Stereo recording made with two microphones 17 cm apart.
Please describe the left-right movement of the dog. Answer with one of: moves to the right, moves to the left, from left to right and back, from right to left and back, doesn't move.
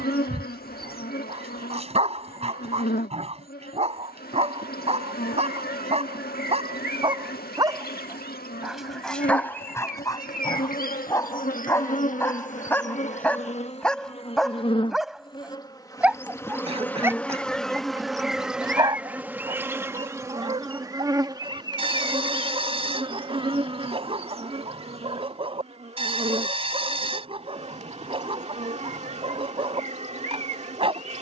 from right to left and back.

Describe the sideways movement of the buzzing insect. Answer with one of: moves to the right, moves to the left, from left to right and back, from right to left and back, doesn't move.
moves to the right.